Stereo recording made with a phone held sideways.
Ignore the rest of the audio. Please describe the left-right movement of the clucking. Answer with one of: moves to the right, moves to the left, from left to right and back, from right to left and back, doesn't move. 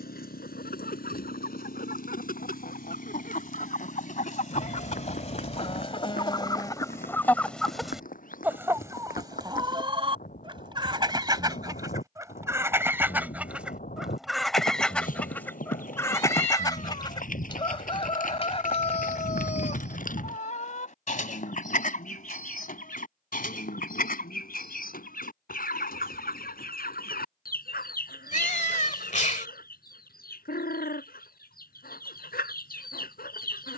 from left to right and back.